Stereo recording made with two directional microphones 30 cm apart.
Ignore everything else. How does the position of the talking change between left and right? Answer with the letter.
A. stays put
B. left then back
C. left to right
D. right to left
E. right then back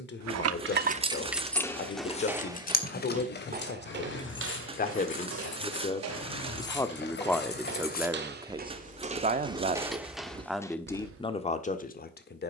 E.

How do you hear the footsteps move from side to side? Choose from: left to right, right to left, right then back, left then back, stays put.
right then back.